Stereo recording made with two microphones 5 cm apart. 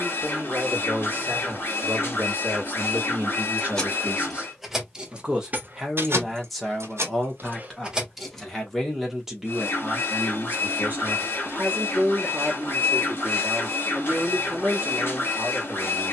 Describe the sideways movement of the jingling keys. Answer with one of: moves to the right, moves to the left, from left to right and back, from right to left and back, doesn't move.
from left to right and back.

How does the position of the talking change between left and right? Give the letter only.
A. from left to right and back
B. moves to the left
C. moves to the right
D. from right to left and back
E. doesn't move
D.